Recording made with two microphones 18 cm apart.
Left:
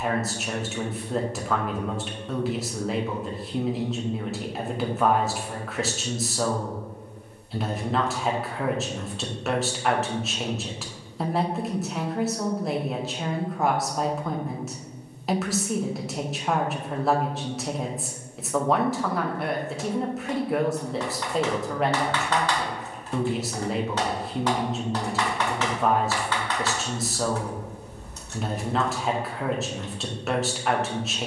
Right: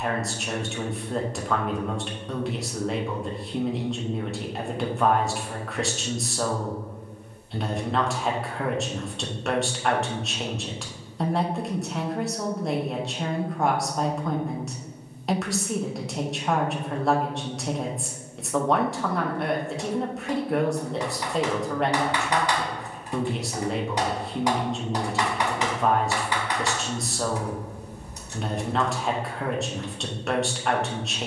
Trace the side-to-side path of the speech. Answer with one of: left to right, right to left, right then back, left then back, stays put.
stays put.